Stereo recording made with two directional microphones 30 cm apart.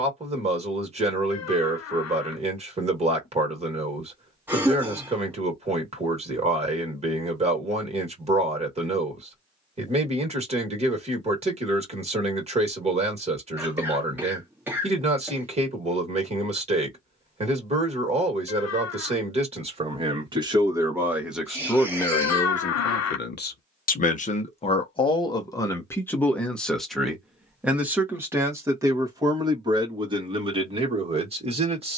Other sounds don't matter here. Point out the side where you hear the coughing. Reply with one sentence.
In this clip you hear the coughing in the centre.